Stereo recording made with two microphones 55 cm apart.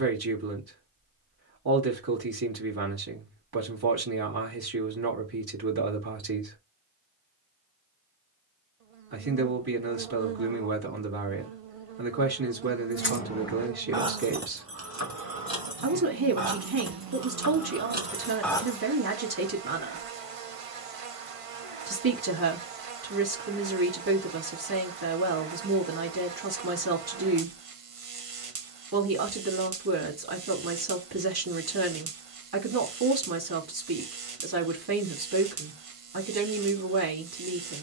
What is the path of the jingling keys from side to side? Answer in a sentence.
You can hear the jingling keys go right and come back.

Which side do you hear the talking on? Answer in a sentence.
In this clip you hear the talking on the right.